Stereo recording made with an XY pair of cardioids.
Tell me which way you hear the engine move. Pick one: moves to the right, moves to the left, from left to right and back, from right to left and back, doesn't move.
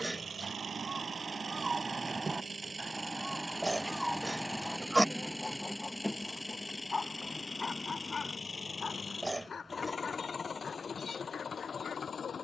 moves to the left.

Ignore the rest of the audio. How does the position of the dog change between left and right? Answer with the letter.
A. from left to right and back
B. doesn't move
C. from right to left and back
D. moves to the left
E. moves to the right
D.